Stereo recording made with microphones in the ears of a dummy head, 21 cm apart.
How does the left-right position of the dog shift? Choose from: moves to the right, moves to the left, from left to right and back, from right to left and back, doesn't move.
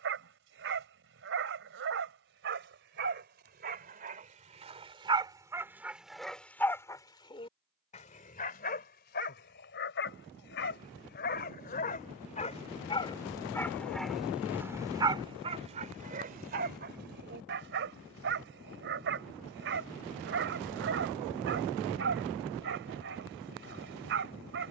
from right to left and back.